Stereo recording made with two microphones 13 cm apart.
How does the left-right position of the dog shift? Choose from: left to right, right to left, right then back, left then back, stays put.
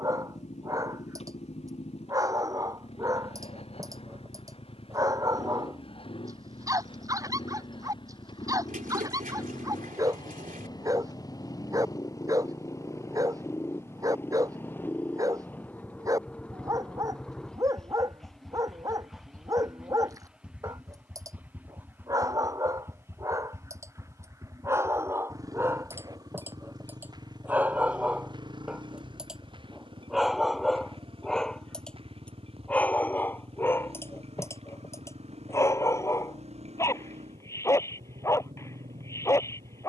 right to left.